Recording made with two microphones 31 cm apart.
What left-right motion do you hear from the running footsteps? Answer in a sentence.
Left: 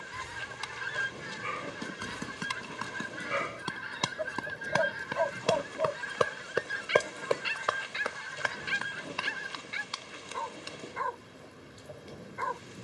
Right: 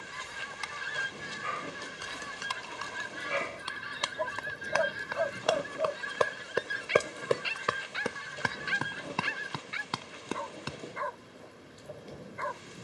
You can hear the running footsteps move from left to right.